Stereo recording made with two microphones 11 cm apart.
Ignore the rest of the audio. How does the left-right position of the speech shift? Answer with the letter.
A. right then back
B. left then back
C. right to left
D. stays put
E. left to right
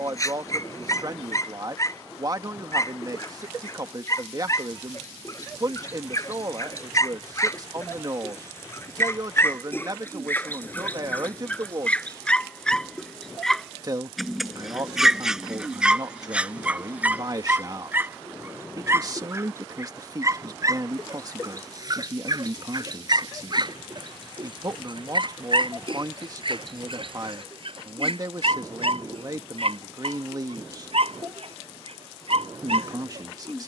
D.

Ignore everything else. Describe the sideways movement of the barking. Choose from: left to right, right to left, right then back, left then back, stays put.
left to right.